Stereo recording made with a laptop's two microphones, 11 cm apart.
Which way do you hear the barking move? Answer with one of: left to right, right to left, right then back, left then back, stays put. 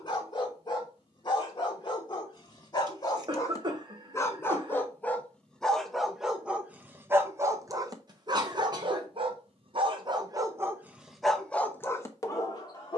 right then back.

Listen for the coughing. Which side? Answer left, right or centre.
right.